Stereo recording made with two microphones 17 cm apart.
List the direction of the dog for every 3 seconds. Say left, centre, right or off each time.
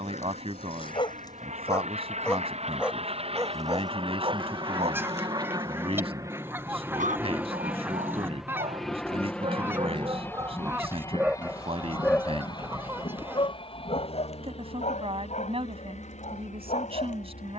left, right, right, right, left, left.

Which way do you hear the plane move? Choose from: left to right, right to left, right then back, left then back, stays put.
right to left.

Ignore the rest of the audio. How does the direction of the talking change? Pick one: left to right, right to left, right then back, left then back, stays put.
stays put.